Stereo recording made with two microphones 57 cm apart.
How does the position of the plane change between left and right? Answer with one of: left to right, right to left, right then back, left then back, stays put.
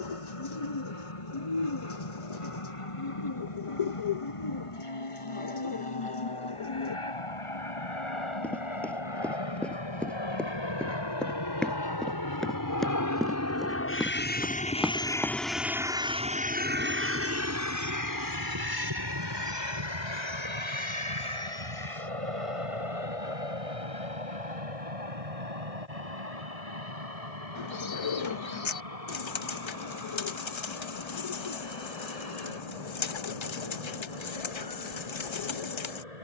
left to right.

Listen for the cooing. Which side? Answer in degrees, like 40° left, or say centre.
50° left.